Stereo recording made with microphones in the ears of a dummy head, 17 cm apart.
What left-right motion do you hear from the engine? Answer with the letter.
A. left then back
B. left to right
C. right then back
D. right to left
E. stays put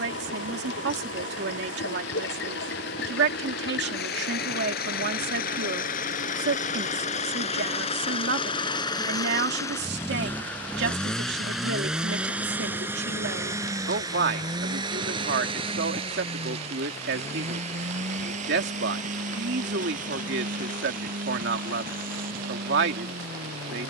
B.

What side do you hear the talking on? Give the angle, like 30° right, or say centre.
60° right.